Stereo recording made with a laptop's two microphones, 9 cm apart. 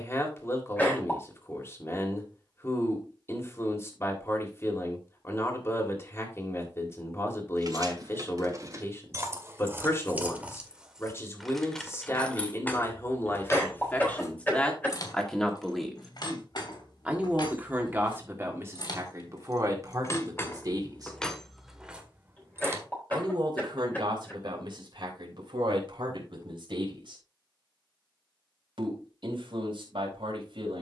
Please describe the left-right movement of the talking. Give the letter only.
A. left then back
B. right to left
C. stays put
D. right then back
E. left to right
E.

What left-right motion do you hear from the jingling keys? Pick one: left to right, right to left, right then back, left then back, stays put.
left then back.